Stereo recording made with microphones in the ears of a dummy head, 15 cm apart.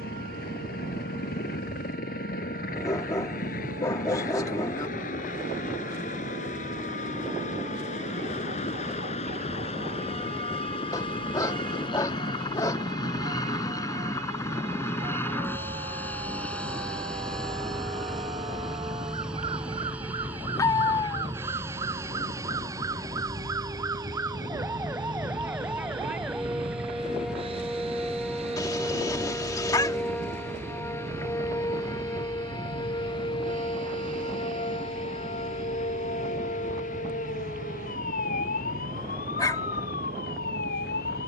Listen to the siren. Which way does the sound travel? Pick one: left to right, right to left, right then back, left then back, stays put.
right to left.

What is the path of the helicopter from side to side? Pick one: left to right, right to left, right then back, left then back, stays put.
left to right.